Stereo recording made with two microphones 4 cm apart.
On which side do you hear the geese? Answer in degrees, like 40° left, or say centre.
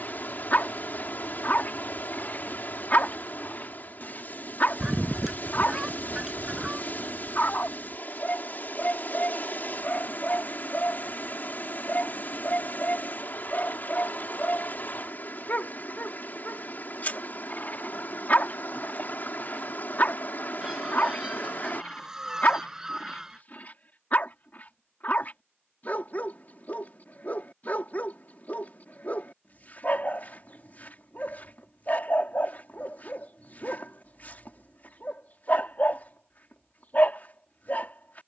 10° right.